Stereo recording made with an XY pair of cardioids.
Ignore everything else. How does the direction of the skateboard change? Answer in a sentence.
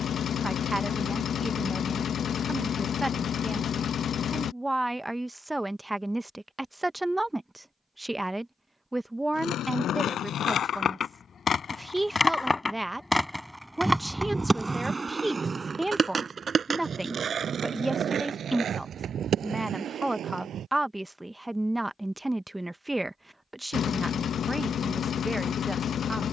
You can hear the skateboard travel towards the right.